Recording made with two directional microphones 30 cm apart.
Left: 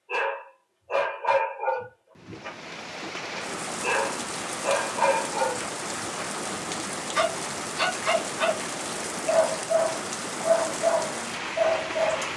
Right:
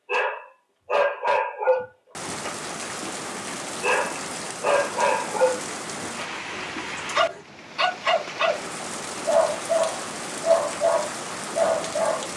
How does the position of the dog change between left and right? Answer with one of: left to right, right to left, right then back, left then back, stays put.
stays put.